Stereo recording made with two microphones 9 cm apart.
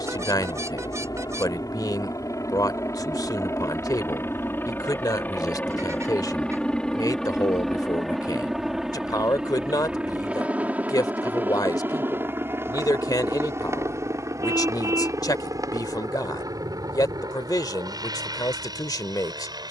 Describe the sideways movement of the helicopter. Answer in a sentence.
In this clip you hear the helicopter travel towards the right.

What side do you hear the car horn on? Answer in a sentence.
You can hear the car horn on the right.